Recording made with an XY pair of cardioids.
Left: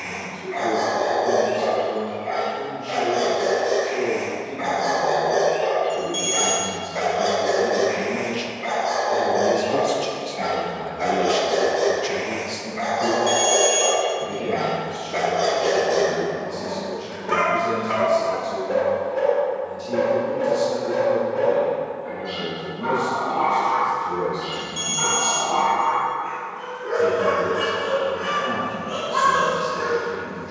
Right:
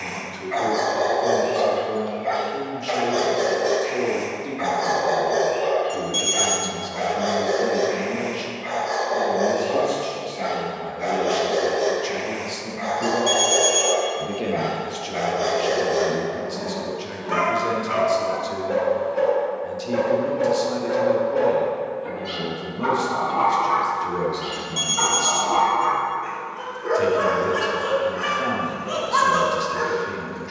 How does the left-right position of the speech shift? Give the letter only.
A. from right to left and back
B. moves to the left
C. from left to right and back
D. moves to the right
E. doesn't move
A.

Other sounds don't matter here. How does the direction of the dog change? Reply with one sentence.
In this clip you hear the dog go left and come back.